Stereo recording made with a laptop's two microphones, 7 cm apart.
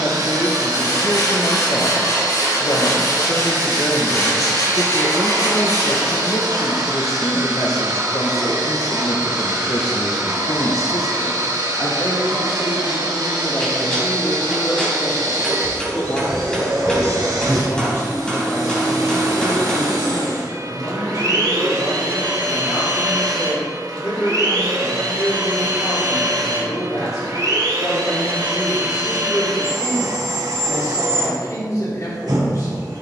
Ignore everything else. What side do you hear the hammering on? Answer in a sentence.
In this clip you hear the hammering in the centre.